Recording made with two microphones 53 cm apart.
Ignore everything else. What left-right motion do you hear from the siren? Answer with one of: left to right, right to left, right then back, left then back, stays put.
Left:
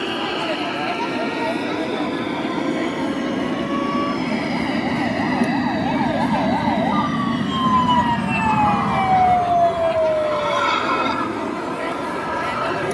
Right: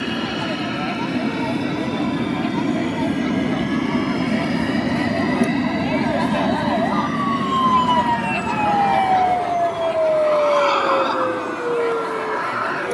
left to right.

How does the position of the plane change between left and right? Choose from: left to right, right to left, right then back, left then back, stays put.
right to left.